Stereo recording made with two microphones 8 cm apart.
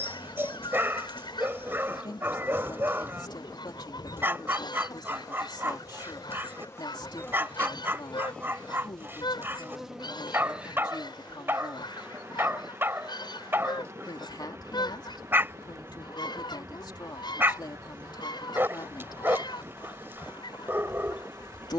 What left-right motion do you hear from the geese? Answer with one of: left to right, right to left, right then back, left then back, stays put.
stays put.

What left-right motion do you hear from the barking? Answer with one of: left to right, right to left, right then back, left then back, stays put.
stays put.